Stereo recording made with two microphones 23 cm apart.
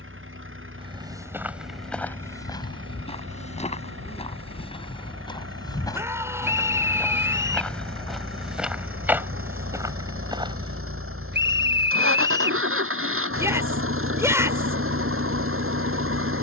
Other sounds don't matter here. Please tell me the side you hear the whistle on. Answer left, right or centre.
right.